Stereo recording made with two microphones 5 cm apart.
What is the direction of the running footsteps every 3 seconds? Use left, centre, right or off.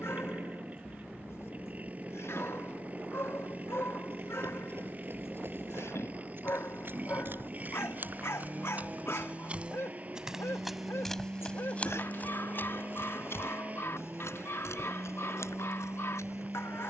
off, right, right, centre, left, left.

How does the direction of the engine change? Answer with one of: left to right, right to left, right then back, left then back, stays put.
stays put.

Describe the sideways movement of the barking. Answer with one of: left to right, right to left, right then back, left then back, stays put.
stays put.